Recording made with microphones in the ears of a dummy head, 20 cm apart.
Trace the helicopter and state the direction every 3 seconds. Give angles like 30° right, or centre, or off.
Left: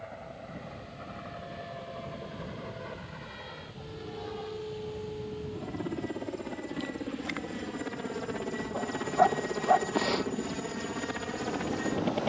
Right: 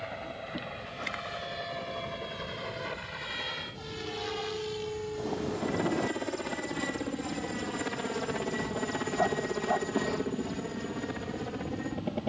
70° right, 60° right, 30° right, 20° left.